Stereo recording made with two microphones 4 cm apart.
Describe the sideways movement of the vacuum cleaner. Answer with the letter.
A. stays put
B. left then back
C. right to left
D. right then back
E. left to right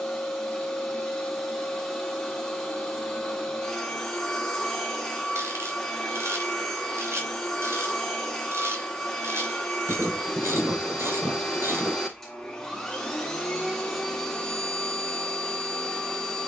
A.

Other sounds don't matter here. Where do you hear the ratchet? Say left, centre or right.
right.